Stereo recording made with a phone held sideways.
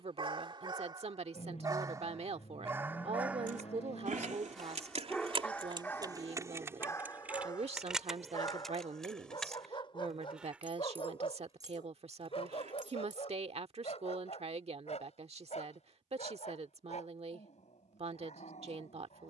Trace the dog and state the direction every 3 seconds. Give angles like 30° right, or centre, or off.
30° right, centre, 30° left, 40° left, 50° left, 60° left, 60° left.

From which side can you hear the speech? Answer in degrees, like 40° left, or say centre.
50° right.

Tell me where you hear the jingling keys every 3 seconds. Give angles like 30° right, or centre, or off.
off, 50° right, 10° right, 10° right, 50° right, off, off.